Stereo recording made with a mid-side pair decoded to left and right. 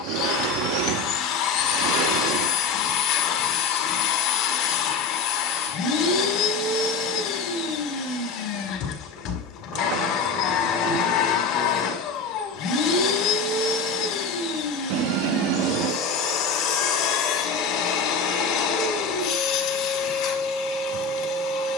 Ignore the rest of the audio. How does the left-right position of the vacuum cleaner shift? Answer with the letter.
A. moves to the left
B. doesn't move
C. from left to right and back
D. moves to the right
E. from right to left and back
B.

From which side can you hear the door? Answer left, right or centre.
right.